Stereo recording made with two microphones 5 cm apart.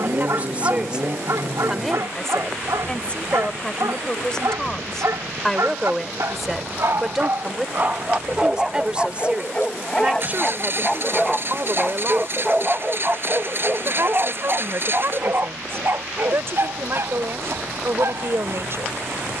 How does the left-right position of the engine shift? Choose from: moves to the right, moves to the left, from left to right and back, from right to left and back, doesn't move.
doesn't move.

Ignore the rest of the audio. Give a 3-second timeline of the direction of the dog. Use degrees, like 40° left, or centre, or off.
70° right, 70° right, 40° right, 10° left, 30° right, 60° right, 60° right.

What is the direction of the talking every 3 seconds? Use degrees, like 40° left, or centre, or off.
10° right, 10° left, 10° right, 30° right, 50° right, 50° right, 50° right.